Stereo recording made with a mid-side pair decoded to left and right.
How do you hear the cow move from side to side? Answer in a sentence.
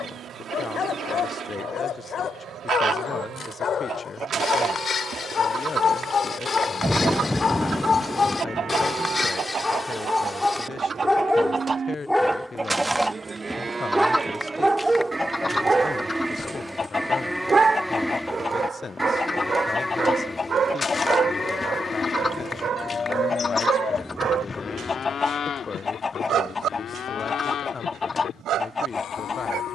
You can hear the cow move from right to left.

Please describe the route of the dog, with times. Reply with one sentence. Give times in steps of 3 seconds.
You can hear the dog on the left from 0 s, in the centre from 9 s and on the right from 15 s.